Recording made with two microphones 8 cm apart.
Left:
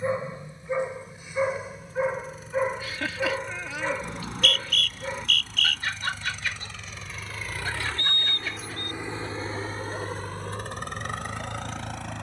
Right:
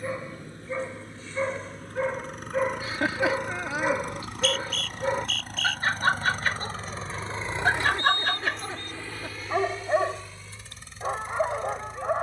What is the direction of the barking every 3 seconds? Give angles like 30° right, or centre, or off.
10° left, 20° right, 60° right, 70° right.